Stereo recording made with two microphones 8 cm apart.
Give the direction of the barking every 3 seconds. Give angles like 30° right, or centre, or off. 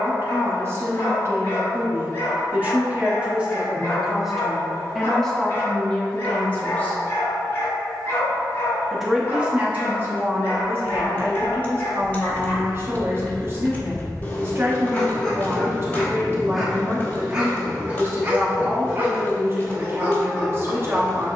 30° left, 30° left, 30° left, 30° left, 30° left, centre, 20° right.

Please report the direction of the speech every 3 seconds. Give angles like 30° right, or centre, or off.
30° right, centre, 20° left, 30° right, 30° right, 30° right, 30° right.